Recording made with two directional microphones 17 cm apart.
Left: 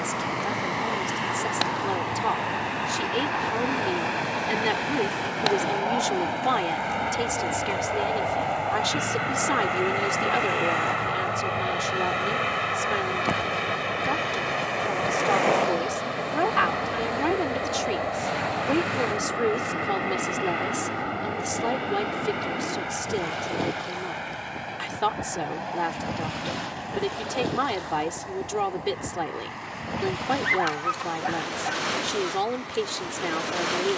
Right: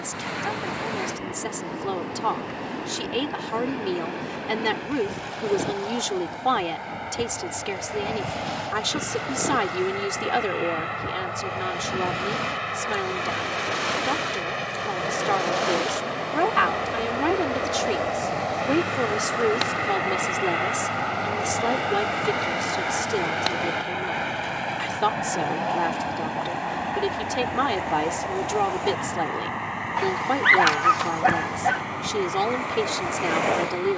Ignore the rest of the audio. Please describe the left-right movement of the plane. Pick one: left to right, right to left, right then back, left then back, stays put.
left to right.